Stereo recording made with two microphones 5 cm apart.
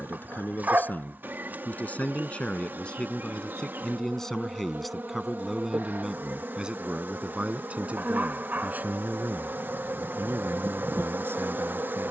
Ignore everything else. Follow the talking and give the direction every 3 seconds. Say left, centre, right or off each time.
left, centre, right, right.